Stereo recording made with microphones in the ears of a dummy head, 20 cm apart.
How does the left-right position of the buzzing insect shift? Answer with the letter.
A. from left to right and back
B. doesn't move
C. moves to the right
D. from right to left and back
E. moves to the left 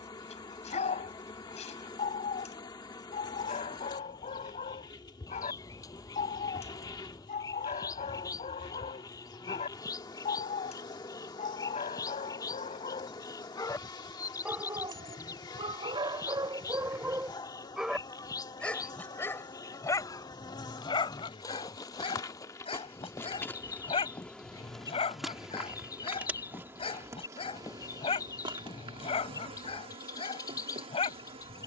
C.